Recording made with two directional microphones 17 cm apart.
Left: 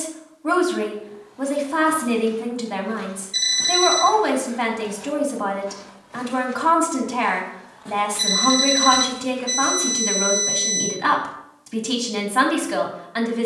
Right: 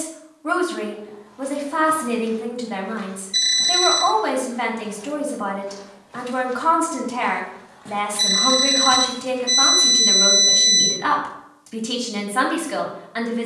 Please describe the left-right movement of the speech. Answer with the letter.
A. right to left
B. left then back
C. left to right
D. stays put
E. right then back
D.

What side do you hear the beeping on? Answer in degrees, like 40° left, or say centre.
10° right.